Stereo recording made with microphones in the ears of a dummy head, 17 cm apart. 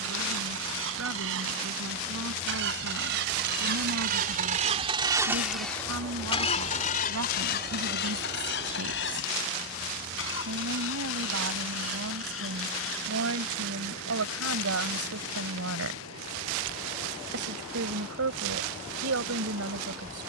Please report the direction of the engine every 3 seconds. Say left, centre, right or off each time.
right, right, left, left, left, left, left.